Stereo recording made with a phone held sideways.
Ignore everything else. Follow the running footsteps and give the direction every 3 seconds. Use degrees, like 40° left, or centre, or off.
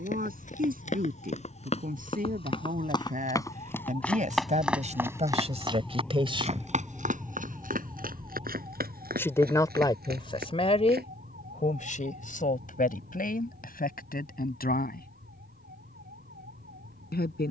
40° left, centre, 60° right, 70° right, off, off.